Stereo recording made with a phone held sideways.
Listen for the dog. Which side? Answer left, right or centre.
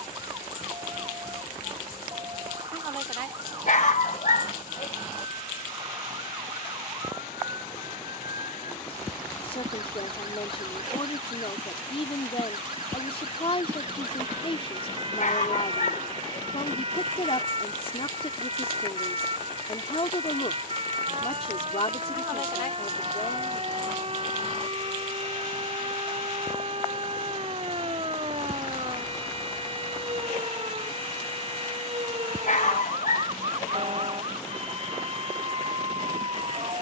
left.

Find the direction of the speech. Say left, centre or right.
left.